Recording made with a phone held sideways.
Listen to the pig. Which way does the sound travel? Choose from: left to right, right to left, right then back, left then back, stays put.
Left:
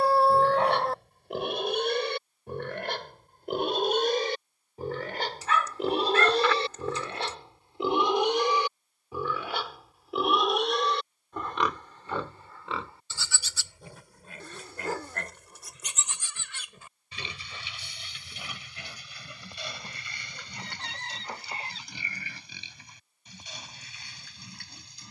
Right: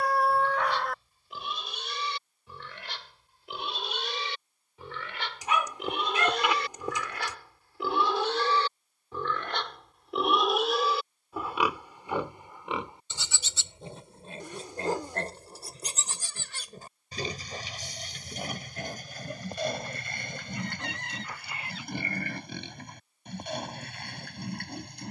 left to right.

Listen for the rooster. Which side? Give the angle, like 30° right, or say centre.
30° left.